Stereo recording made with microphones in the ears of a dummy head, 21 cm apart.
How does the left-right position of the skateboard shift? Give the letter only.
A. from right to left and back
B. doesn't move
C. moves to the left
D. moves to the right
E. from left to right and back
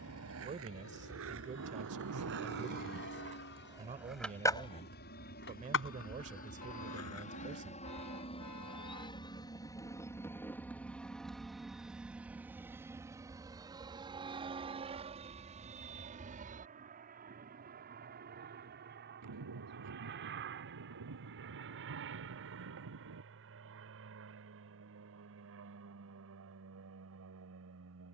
C.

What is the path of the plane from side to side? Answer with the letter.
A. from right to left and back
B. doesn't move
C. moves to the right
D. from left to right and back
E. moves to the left
C.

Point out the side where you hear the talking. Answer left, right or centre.
right.